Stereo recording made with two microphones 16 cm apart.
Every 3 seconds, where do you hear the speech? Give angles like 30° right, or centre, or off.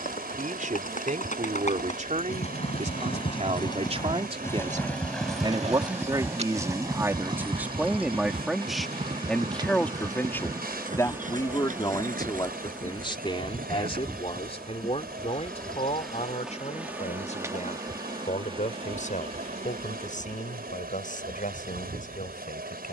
50° right, 40° right, 10° right, 20° left, 30° left, 50° left, 50° left, 60° left.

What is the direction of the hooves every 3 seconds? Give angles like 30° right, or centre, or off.
50° left, 20° left, 30° right, 50° right, 60° right, off, off, off.